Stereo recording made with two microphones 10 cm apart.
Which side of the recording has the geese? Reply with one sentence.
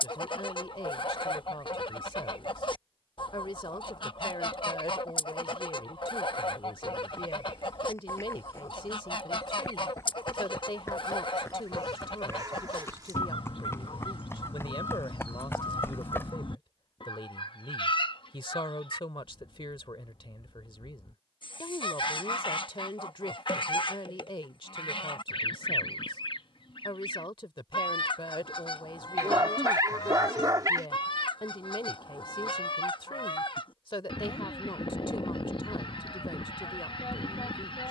In this clip you hear the geese on the left.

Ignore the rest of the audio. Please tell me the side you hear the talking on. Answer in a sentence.
In this clip you hear the talking on the left.